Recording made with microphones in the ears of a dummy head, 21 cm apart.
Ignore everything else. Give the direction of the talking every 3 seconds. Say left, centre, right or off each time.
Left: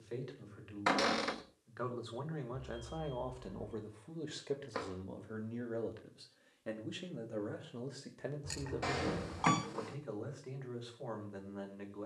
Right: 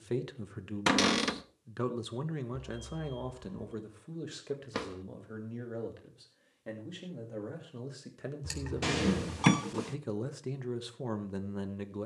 right, centre, centre, right.